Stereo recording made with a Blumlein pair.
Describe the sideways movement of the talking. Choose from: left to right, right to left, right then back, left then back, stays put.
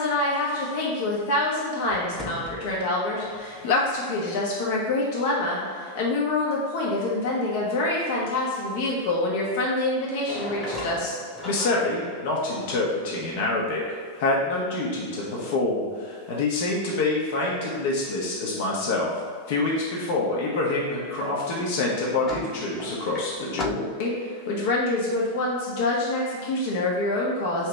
stays put.